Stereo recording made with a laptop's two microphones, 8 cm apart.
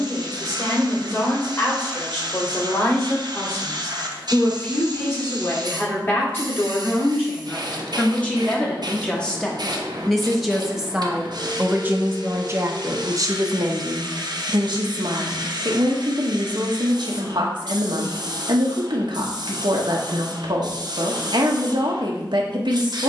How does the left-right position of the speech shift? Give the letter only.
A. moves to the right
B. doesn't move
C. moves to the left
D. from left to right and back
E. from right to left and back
A.